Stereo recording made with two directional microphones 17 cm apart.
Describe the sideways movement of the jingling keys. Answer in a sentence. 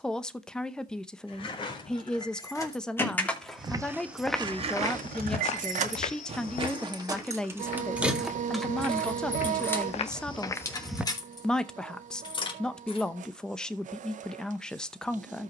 You can hear the jingling keys move from left to right and back again.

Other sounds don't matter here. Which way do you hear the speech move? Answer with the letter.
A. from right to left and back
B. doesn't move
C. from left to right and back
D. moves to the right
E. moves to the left
B.